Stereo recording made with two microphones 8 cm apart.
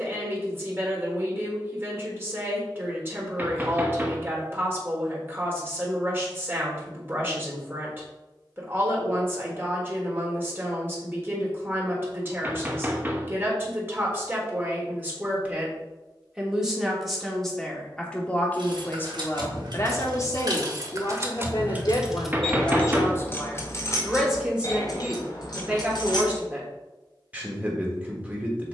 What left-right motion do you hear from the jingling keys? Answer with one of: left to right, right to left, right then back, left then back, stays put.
right to left.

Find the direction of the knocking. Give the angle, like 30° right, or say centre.
20° right.